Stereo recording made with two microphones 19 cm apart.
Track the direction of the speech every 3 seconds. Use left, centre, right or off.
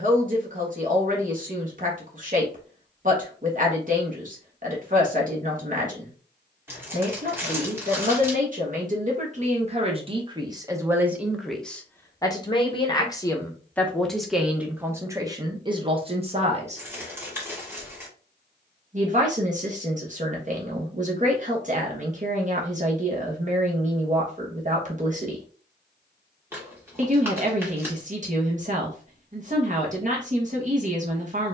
right, right, right, right, centre, right, right, right, right, right, right.